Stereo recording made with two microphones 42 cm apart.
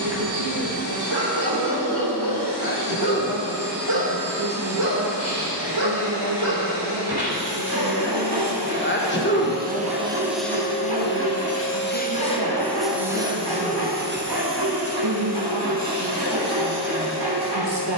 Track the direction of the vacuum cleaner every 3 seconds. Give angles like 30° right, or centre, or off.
50° right, 50° right, 50° right, centre, 10° right, 40° right.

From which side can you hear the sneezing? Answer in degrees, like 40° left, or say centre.
30° left.